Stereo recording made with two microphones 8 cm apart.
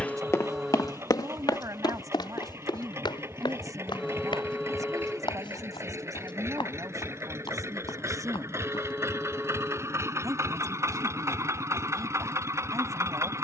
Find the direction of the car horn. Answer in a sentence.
You can hear the car horn in the centre.